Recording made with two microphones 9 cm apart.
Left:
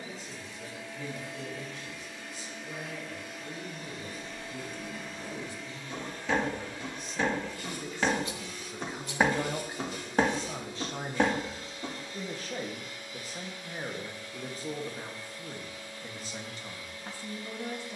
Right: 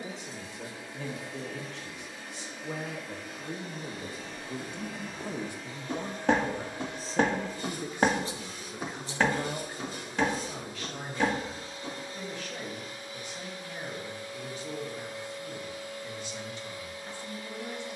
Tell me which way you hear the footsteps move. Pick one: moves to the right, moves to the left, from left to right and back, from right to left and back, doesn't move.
moves to the left.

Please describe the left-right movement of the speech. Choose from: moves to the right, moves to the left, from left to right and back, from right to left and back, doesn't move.
moves to the left.